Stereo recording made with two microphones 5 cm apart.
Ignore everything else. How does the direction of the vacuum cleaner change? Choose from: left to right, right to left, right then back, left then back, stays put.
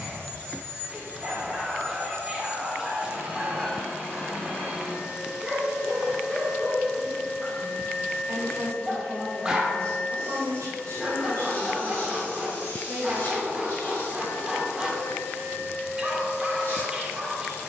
right to left.